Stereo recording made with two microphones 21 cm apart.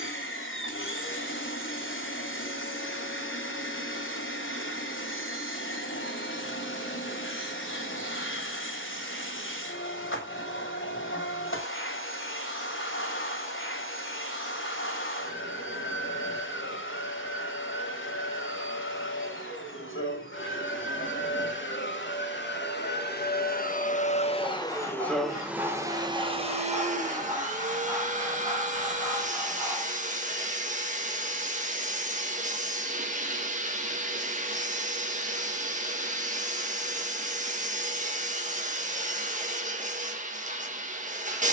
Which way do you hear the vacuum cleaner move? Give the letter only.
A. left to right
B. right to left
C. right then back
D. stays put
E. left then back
A.